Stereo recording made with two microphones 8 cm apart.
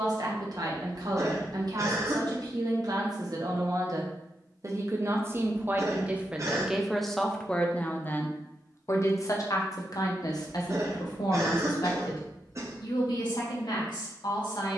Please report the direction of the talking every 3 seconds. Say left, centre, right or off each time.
right, right, centre, left, left.